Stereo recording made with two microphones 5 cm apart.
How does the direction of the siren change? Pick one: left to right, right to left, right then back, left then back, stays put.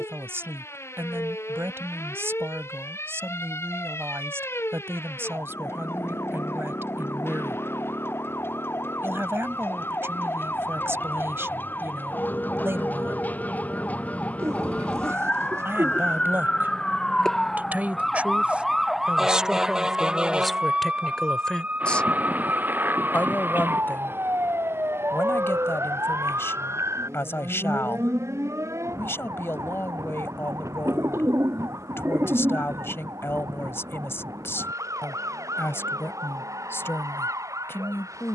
left to right.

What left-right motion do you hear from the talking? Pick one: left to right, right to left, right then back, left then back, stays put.
right to left.